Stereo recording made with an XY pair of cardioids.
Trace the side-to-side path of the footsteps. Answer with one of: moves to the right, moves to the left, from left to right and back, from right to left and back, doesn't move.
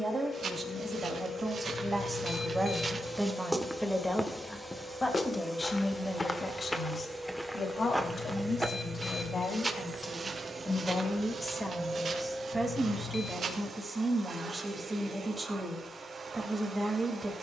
from right to left and back.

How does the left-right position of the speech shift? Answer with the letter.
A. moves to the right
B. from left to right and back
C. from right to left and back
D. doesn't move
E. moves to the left
C.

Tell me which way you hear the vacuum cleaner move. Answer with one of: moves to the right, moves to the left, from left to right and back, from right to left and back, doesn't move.
moves to the right.